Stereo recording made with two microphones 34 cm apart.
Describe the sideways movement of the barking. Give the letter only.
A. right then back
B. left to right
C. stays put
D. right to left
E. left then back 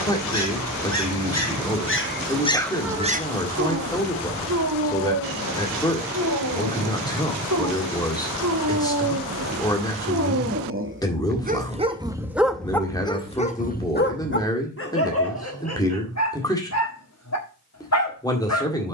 A.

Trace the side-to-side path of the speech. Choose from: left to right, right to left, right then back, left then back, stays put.
stays put.